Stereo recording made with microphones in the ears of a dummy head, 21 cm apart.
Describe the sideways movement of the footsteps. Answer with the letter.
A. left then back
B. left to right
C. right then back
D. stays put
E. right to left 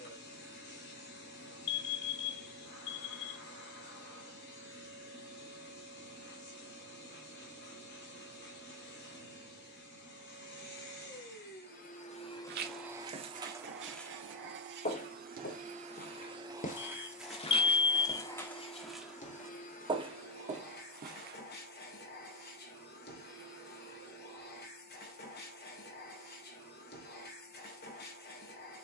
A.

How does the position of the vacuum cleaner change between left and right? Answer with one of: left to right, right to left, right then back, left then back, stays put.
right then back.